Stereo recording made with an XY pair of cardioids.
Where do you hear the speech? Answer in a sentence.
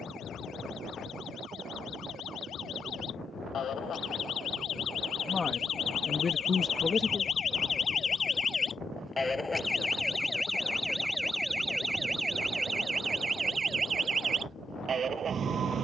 You can hear the speech on the left.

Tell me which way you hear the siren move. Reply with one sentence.
In this clip you hear the siren move to the right.